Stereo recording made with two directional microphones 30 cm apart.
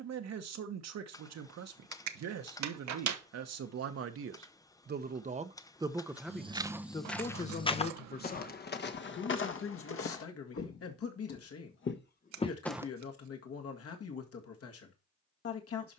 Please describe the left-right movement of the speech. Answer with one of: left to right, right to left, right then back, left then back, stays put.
right to left.